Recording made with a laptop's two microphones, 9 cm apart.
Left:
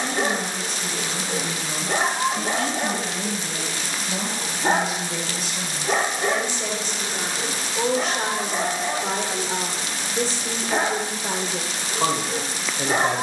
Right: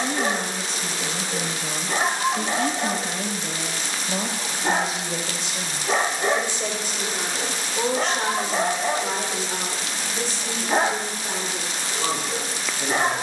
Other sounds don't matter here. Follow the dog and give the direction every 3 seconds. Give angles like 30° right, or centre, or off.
40° left, 30° left, 20° right, 30° right, 20° left.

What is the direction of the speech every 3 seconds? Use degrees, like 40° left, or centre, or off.
30° right, 30° right, centre, 40° left, 60° left.